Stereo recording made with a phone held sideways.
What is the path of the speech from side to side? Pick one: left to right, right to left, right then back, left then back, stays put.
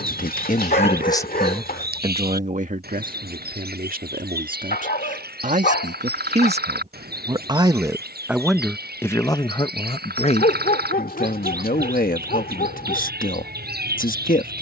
right then back.